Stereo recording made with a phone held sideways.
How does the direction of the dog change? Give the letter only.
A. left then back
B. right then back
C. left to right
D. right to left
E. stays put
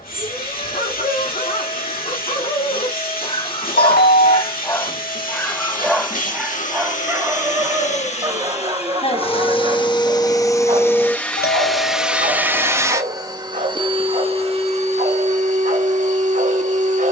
C.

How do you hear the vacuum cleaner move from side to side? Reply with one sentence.
You can hear the vacuum cleaner travel towards the right.